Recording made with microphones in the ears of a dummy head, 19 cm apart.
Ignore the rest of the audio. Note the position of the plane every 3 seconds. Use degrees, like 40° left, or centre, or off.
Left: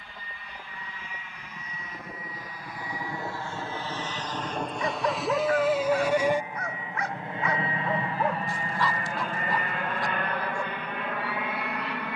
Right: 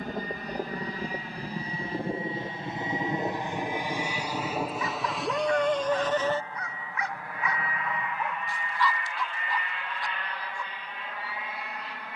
30° right, 10° right, 20° left, 50° left.